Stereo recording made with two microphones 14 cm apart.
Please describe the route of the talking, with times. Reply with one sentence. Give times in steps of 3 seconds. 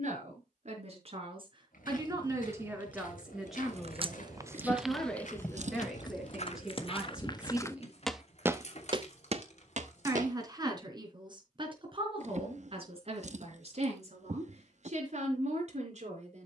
In this clip you hear the talking on the right from 0 s, in the centre from 3 s and on the right from 9 s.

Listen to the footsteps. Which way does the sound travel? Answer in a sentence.
In this clip you hear the footsteps move to the right.